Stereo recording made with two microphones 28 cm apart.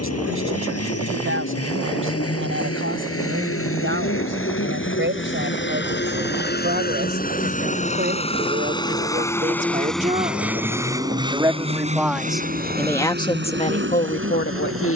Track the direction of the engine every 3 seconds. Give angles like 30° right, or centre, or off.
60° left, 50° left, 30° left, 10° right, 40° right.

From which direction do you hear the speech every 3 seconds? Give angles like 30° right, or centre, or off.
50° right, 40° right, 40° right, 20° right, 20° left.